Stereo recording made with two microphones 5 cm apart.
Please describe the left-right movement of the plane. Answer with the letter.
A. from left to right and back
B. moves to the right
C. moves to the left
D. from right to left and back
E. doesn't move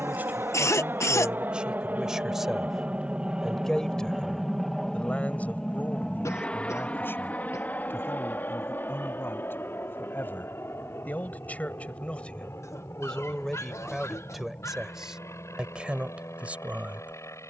C.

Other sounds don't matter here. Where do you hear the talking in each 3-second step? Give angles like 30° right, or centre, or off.
20° right, 20° left, 40° left, 40° left, 10° left, 20° right.